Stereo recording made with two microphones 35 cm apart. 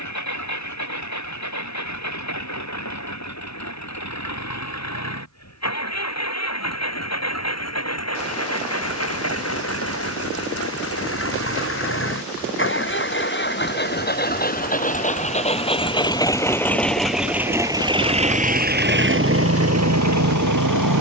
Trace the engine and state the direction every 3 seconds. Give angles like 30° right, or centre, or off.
50° left, 50° left, 50° left, 40° left, 30° left, 10° left, 40° right.